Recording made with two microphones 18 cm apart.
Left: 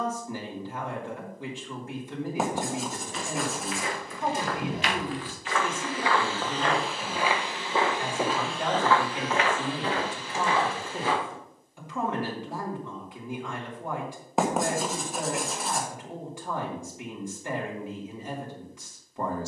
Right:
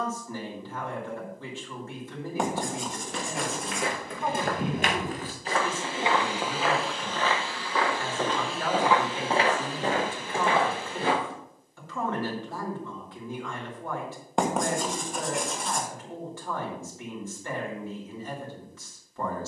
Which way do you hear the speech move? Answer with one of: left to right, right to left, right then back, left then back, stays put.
stays put.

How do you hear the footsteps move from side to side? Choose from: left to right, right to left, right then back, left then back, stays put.
left then back.